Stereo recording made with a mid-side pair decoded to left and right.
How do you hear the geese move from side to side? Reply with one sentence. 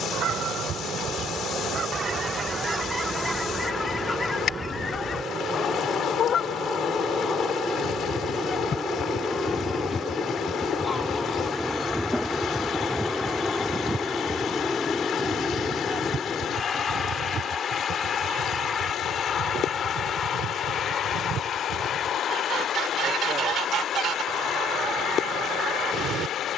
In this clip you hear the geese move from right to left and back again.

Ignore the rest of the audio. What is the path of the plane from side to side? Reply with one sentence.
In this clip you hear the plane go from the right side to the left.